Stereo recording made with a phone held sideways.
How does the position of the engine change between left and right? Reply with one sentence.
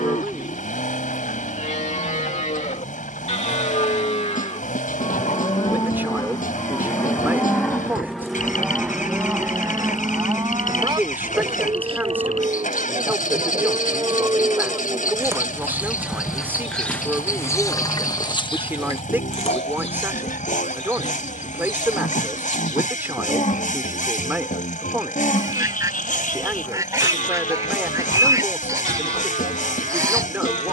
You can hear the engine stay in one place.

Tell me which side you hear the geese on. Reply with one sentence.
In this clip you hear the geese on the right.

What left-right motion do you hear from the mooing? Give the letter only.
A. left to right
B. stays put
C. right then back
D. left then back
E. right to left
C.